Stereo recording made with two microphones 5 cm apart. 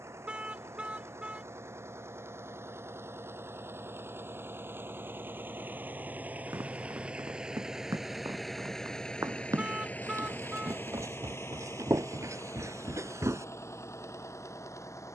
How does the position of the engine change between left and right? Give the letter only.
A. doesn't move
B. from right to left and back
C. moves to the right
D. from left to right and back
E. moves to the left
E.